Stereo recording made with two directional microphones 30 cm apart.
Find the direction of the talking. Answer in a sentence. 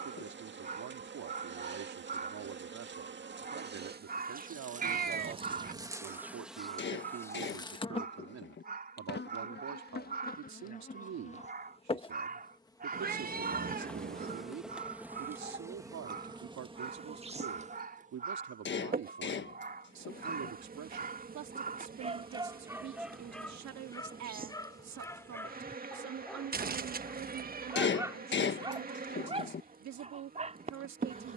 In this clip you hear the talking on the right.